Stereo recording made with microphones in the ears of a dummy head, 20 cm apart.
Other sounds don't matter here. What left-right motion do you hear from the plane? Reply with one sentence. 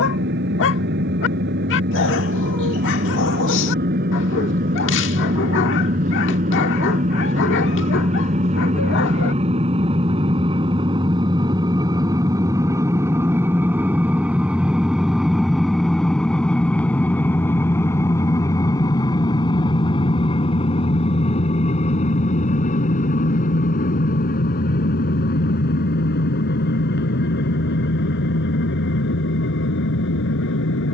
You can hear the plane go from the right side to the left.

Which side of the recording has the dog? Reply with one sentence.
You can hear the dog on the left.